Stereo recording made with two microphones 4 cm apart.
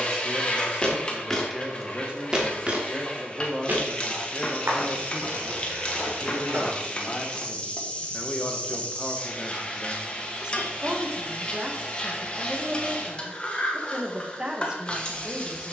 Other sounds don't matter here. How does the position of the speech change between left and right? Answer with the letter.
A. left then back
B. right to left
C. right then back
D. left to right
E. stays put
A.